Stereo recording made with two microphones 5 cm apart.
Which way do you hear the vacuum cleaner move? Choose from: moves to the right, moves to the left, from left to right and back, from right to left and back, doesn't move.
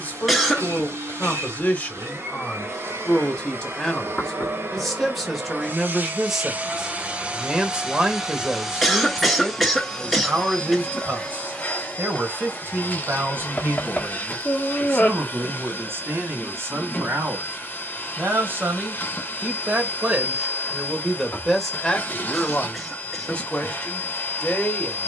moves to the left.